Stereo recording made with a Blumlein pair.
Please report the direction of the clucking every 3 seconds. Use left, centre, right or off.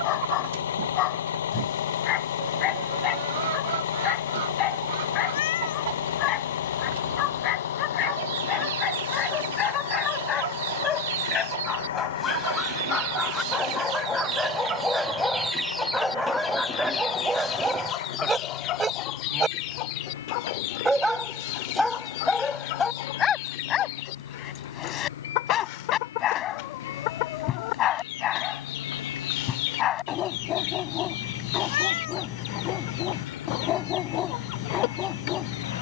right, right, right, right, right, centre, left, left, left, left, left, left.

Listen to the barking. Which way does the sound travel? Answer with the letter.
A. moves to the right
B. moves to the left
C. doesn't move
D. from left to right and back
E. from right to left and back
D.